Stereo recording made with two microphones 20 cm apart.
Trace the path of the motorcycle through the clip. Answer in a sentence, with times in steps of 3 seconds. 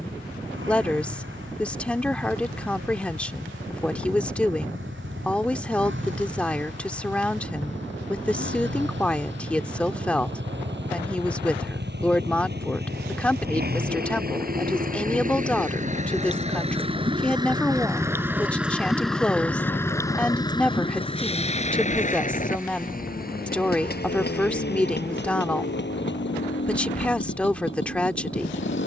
You can hear the motorcycle on the right from 0 s, in the centre from 18 s and on the left from 21 s.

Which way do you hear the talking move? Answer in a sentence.
You can hear the talking stay put.